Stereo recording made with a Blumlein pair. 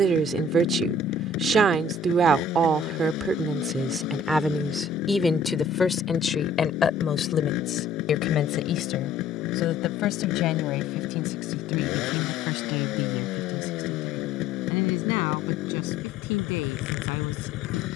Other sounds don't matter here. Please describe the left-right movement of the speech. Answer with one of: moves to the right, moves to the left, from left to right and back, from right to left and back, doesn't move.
moves to the left.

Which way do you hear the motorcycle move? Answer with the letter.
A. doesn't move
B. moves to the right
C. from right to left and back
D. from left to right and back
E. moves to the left
A.